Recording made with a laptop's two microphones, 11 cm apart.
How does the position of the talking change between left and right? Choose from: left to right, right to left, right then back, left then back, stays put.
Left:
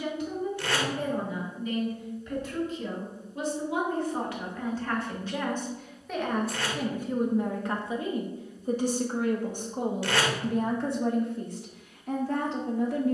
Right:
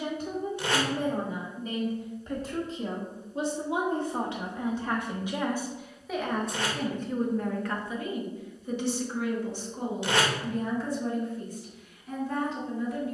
right to left.